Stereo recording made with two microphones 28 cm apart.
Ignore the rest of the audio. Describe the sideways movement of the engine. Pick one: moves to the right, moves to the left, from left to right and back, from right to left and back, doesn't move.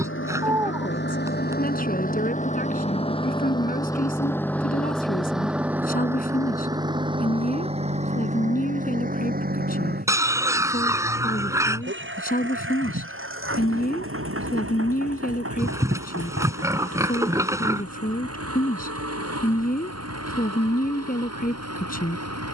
moves to the right.